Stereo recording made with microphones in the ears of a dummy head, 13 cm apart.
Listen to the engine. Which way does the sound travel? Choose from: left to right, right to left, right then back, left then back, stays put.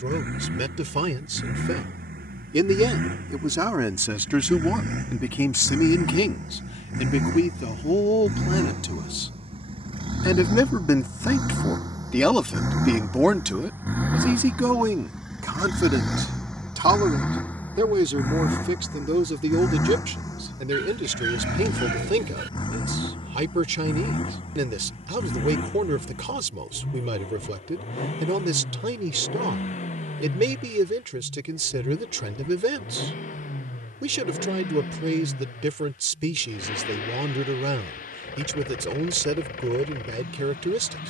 right to left.